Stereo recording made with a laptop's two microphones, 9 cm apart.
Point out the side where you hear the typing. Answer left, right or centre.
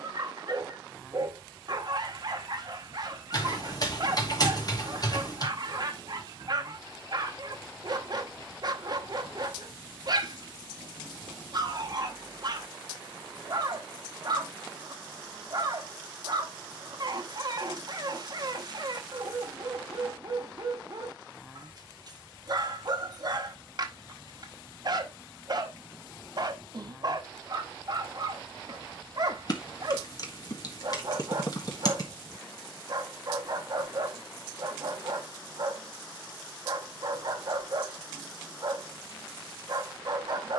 left.